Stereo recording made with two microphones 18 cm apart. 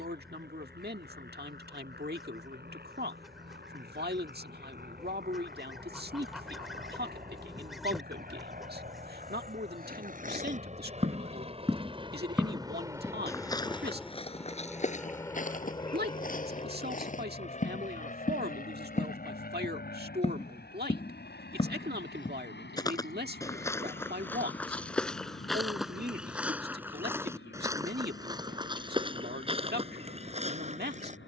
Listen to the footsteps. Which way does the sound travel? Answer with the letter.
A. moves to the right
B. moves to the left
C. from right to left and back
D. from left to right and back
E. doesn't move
C.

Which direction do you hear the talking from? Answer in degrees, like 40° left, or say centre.
60° right.